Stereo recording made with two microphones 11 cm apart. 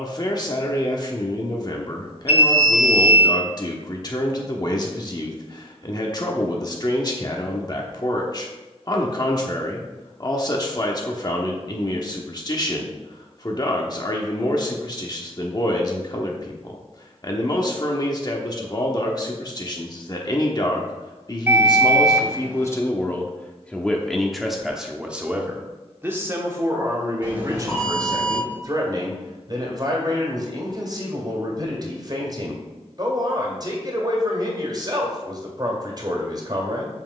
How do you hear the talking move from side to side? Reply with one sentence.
You can hear the talking travel towards the right.